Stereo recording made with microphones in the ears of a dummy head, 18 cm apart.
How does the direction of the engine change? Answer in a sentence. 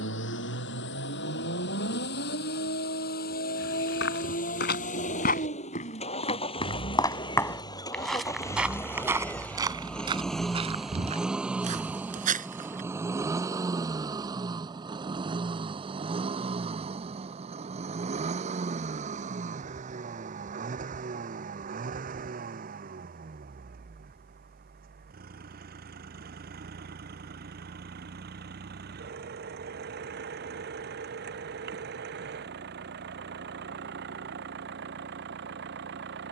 You can hear the engine move from left to right.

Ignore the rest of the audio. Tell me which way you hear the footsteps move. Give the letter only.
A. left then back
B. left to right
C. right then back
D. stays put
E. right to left
B.